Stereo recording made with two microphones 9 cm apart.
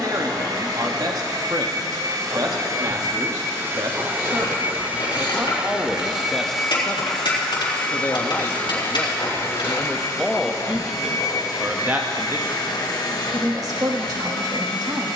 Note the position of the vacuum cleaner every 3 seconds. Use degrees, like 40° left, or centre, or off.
40° right, 20° right, 10° left, 40° left, 60° left.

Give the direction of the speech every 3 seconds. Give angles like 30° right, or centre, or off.
50° right, 40° right, 20° left, centre, 40° right.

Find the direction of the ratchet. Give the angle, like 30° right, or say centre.
70° left.